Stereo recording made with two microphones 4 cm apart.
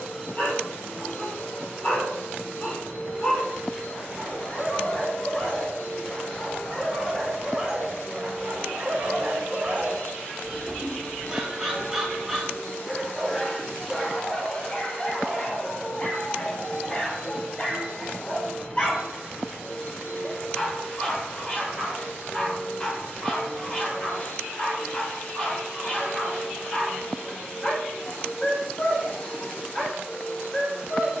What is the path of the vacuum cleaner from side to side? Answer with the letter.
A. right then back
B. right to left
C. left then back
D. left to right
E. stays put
E.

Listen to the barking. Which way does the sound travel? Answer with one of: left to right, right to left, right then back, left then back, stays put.
right then back.